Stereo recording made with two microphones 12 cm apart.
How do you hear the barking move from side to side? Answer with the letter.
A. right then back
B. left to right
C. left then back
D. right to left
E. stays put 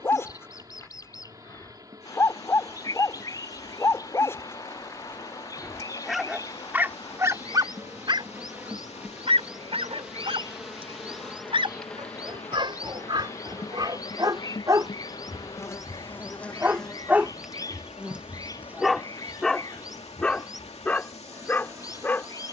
A.